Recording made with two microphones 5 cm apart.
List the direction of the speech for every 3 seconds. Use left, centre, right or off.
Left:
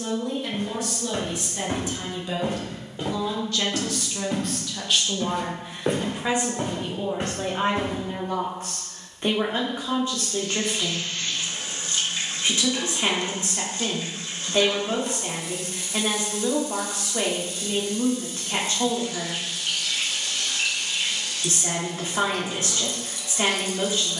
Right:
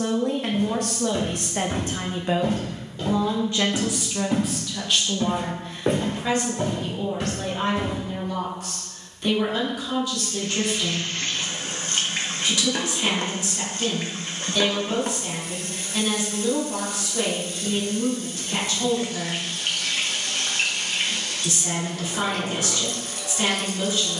right, centre, left, left, left, left, left, left.